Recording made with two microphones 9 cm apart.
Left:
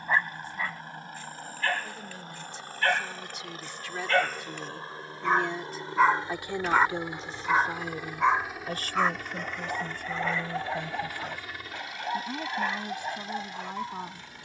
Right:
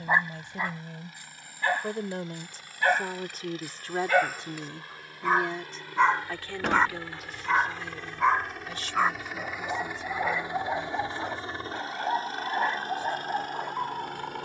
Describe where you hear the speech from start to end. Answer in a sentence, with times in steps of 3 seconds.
You can hear the speech on the right from 0 s and on the left from 6 s.